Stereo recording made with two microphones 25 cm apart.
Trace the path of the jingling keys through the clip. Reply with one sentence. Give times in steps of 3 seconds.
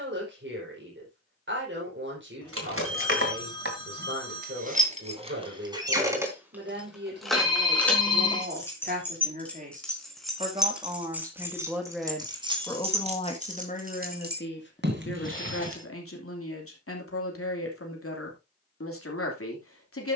In this clip you hear the jingling keys on the right from 0 s, in the centre from 6 s, on the right from 12 s and not at all from 18 s.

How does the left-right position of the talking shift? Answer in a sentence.
You can hear the talking move to the left.